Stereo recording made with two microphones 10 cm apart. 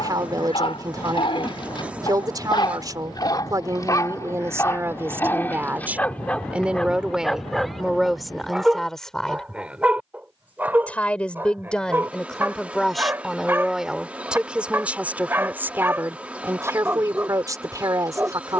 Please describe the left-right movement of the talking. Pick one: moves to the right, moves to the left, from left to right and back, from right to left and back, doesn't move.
from right to left and back.